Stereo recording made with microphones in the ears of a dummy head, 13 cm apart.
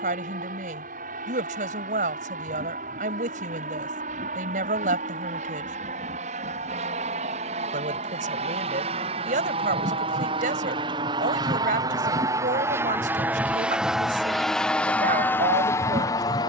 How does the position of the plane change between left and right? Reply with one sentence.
You can hear the plane travel towards the left.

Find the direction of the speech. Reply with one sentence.
In this clip you hear the speech on the right.